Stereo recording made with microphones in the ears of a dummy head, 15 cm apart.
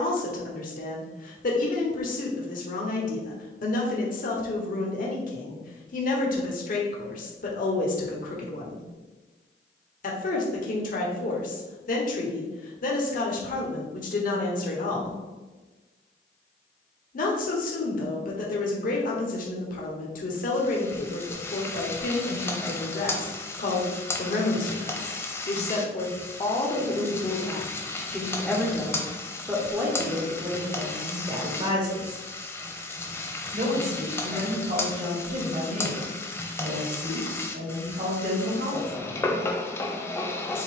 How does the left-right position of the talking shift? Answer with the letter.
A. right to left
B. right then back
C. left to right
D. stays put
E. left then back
C.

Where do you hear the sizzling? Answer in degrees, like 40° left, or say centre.
20° left.